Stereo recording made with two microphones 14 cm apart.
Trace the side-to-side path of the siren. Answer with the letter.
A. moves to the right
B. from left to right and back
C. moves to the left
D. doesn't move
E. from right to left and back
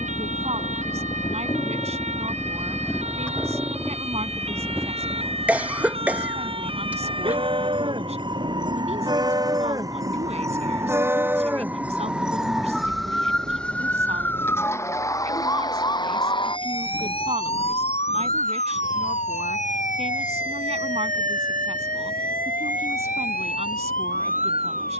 C.